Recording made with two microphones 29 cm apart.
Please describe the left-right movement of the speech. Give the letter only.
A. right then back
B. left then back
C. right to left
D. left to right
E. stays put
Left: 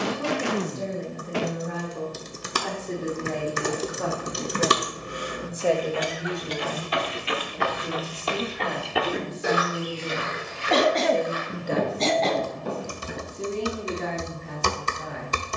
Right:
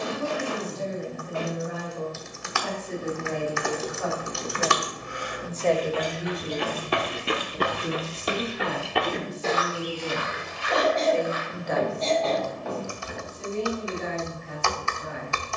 A.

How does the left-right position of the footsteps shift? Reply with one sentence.
You can hear the footsteps travel towards the left.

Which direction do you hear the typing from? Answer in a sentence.
In this clip you hear the typing on the left.